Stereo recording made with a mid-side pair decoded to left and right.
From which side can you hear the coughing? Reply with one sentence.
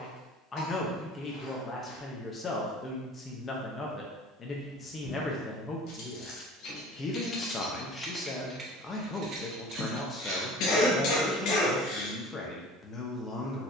In this clip you hear the coughing on the left.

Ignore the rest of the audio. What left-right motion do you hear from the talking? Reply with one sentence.
You can hear the talking stay in one place.